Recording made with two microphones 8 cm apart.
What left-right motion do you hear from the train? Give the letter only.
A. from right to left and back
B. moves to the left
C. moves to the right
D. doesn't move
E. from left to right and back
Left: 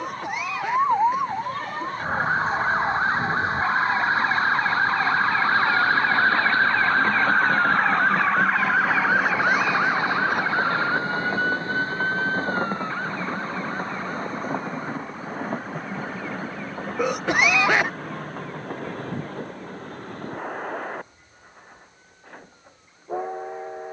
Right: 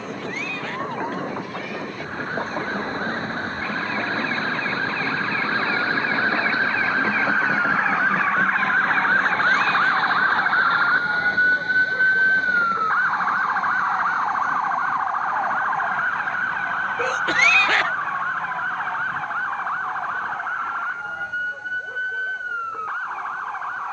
B.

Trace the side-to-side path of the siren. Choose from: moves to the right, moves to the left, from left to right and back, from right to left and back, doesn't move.
moves to the right.